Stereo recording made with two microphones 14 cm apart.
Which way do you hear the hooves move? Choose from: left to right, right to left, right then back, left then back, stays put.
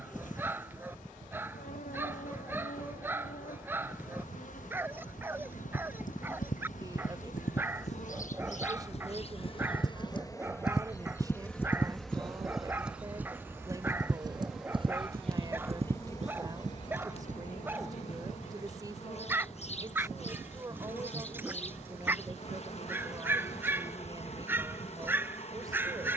left to right.